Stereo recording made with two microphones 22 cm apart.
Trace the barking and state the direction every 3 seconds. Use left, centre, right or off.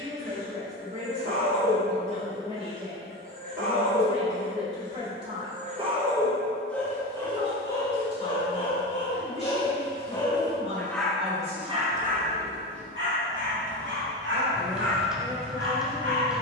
right, right, left, centre, right, right.